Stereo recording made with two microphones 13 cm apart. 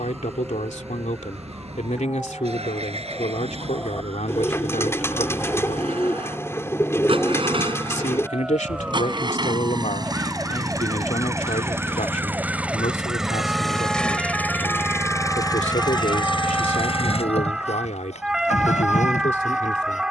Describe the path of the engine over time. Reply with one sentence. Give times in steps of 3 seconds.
You can hear the engine on the right from 0 s, in the centre from 12 s and on the left from 15 s.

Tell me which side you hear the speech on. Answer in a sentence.
You can hear the speech on the left.